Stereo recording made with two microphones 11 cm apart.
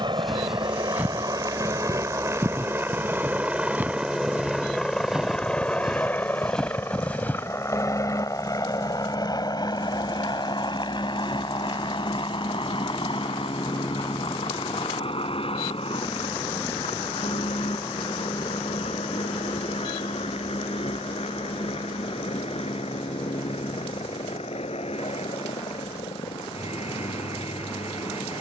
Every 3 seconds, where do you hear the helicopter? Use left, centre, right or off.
right, centre, left, left, left, left, left, left, left, left.